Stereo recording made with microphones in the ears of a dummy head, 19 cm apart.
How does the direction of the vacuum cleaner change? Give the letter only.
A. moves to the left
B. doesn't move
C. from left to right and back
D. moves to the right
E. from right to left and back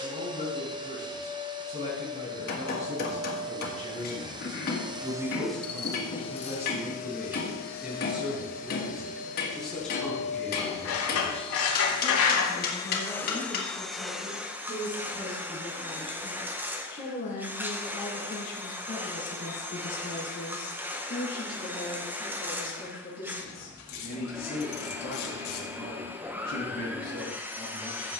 E.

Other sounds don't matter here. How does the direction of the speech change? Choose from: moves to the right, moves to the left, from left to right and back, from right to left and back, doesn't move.
moves to the left.